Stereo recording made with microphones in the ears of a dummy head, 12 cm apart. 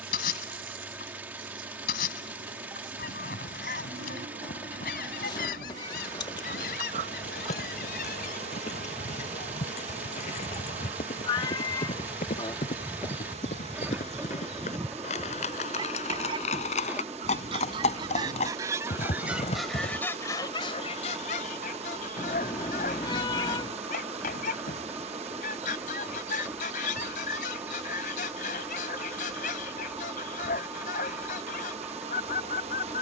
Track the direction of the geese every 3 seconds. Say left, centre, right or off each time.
left, left, left, left, centre, right, centre, left, left, left, left.